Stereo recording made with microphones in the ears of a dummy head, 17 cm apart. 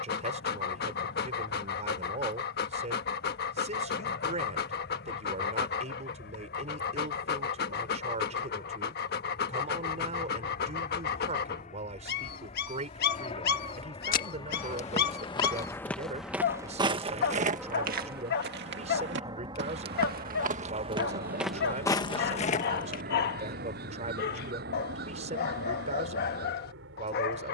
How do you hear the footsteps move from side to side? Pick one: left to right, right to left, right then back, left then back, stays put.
right then back.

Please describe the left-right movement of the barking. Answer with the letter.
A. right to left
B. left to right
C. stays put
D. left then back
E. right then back
C.